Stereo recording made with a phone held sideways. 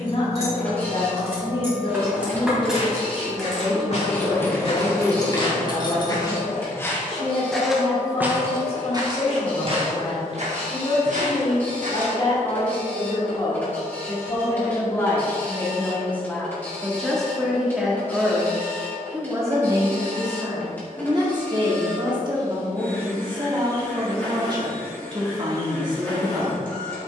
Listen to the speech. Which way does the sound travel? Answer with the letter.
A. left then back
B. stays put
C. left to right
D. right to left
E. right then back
C.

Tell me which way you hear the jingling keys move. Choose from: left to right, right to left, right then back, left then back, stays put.
right to left.